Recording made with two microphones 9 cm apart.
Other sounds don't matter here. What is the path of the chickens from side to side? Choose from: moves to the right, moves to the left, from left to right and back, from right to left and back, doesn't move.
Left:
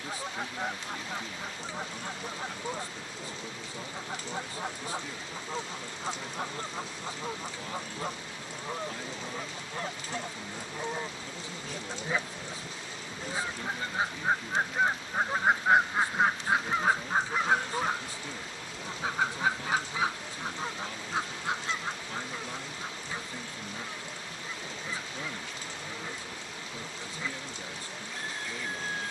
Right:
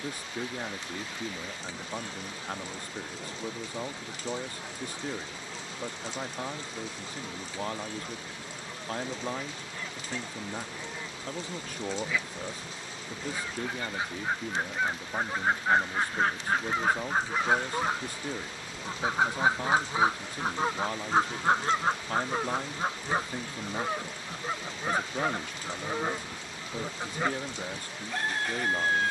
moves to the right.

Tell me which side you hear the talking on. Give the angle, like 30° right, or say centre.
50° right.